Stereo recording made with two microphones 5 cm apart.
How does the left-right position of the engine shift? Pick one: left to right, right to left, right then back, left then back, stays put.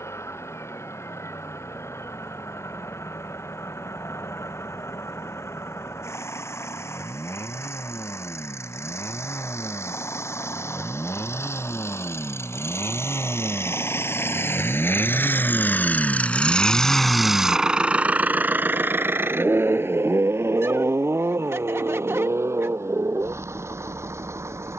left to right.